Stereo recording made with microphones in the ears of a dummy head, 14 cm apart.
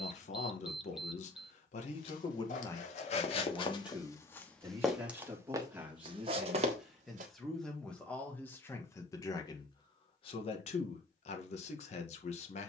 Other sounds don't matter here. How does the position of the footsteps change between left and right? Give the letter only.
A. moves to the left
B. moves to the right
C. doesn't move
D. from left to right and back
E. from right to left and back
B.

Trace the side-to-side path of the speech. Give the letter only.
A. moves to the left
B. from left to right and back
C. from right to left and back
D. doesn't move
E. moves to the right
B.